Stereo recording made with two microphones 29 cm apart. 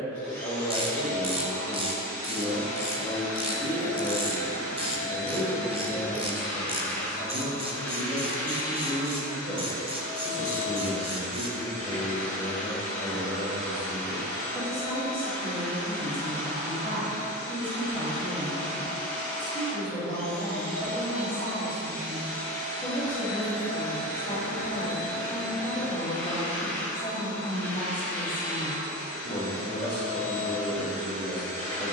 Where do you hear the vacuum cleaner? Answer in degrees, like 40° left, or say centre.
10° left.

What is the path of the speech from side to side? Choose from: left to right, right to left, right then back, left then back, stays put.
stays put.